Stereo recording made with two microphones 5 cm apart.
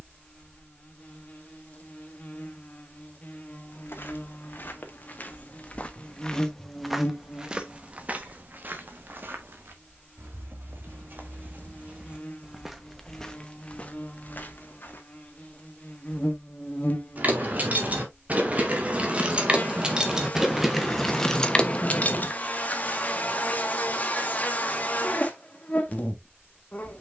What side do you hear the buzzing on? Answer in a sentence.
You can hear the buzzing on the left.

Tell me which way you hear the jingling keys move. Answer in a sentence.
You can hear the jingling keys go from the right side to the left.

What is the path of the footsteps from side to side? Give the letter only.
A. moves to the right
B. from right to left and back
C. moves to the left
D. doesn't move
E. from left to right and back
E.